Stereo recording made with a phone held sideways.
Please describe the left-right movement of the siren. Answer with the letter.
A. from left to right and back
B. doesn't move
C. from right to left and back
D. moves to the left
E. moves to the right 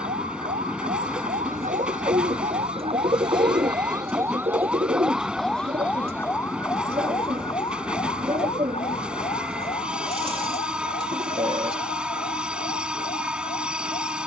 D.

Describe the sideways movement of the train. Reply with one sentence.
You can hear the train stay in one place.